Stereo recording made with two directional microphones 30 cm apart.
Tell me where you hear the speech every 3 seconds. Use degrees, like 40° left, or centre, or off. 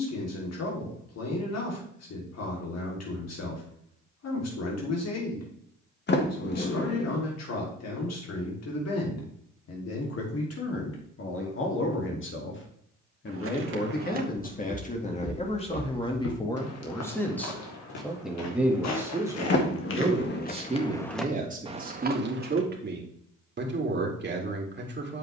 60° left, 60° left, 60° left, 50° left, 30° left, 10° left, 10° right, 30° right, 40° right.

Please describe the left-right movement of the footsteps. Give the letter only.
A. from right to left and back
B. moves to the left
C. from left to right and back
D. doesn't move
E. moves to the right
A.